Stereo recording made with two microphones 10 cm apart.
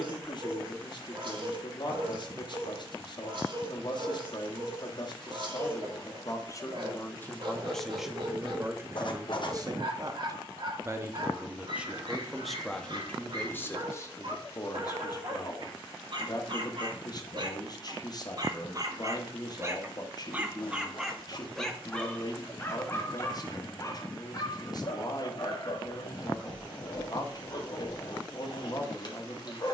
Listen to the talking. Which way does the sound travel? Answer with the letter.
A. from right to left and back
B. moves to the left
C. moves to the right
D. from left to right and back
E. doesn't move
D.